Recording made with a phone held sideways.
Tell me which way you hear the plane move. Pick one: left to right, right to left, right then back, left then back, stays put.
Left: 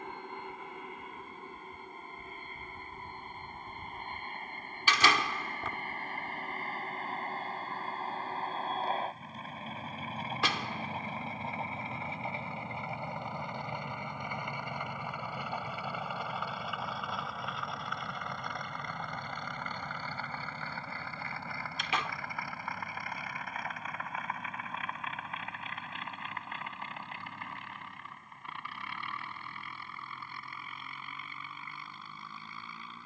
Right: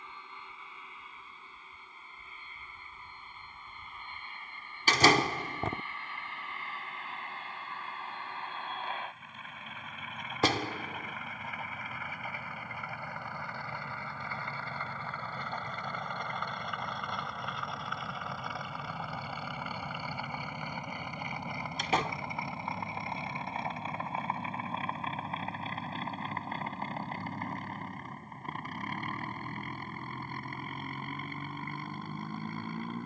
left to right.